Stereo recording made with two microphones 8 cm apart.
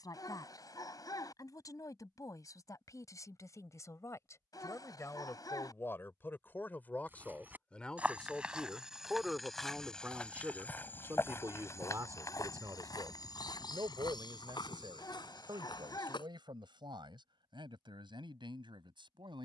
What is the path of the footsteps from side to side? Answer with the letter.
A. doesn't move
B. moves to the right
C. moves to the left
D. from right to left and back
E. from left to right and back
C.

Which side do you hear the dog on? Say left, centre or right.
left.